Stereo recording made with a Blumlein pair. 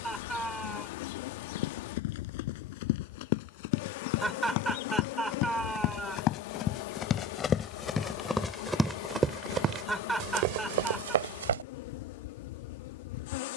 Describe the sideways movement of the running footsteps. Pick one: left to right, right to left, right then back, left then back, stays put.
left to right.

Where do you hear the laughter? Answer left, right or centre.
centre.